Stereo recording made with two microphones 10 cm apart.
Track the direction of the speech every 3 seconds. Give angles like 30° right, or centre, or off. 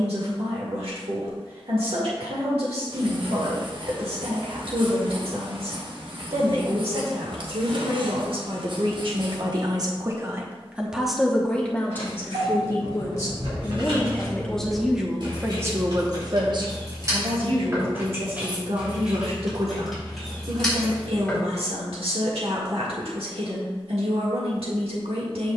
80° right, 80° right, 70° right, 20° right, 20° left, 40° right, 70° right, 70° right, 70° right.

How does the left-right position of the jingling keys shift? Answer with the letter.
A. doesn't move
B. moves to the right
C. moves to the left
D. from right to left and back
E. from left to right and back
C.